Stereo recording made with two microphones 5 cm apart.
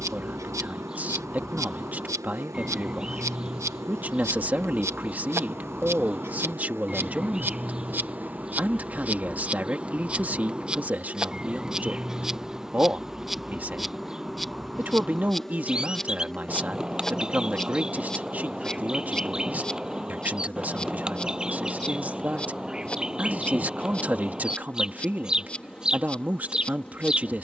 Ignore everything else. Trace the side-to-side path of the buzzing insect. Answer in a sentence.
You can hear the buzzing insect go from the right side to the left.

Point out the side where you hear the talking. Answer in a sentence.
You can hear the talking on the right.